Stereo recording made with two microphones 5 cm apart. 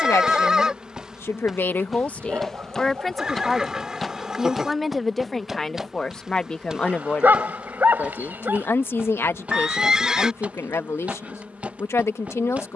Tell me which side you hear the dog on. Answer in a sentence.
You can hear the dog on the right.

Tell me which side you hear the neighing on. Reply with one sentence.
You can hear the neighing in the centre.